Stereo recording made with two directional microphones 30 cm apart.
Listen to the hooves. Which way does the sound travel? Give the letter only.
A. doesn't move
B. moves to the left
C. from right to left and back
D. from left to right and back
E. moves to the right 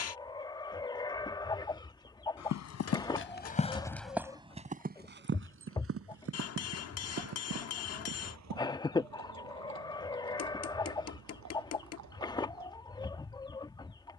E.